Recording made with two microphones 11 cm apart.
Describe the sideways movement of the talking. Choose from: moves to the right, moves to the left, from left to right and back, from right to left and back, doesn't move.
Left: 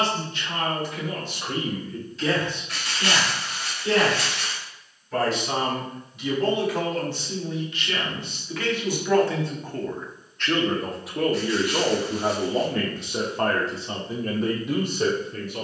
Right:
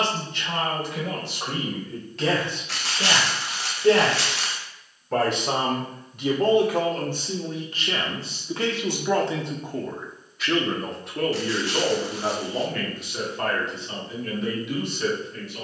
moves to the left.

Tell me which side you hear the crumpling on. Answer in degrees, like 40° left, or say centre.
80° right.